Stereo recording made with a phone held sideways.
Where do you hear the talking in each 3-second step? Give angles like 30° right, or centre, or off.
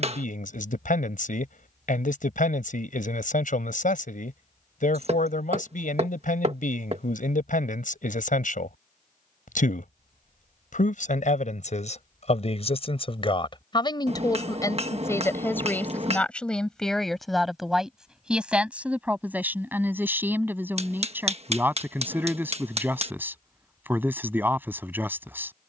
60° left, 60° left, 60° left, 60° left, 30° left, 10° left, 10° right, 10° right, 10° right.